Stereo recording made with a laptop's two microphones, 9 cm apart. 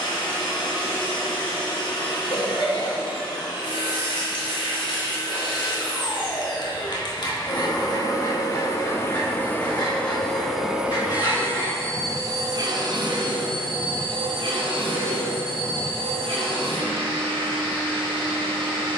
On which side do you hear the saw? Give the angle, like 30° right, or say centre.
50° left.